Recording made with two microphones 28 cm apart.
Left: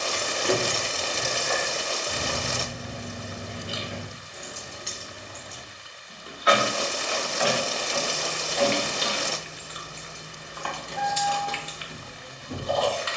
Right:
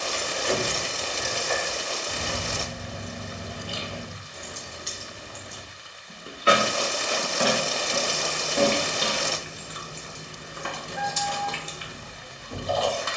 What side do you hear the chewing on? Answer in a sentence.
You can hear the chewing on the right.